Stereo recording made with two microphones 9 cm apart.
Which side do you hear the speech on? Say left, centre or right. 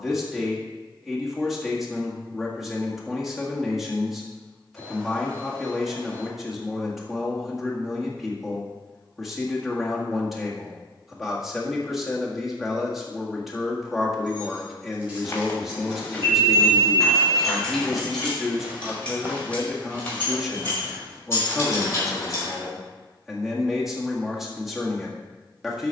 centre.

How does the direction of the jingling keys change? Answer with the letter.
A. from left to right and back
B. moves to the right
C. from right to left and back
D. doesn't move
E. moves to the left
E.